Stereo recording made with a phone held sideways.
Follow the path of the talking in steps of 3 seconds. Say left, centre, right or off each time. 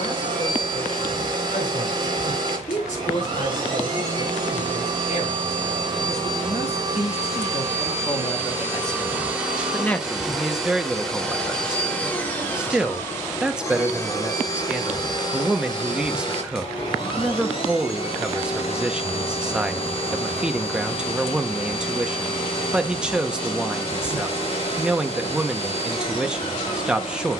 left, left, left, centre, centre, centre, centre, centre, centre.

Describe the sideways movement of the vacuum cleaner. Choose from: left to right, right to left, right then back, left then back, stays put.
right to left.